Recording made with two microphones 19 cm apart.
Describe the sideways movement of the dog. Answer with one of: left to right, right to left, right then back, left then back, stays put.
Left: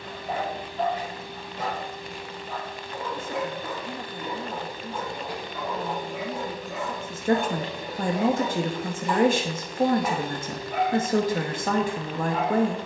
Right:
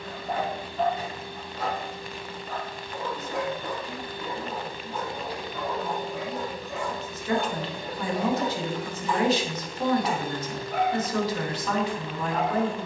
stays put.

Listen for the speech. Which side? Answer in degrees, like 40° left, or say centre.
50° left.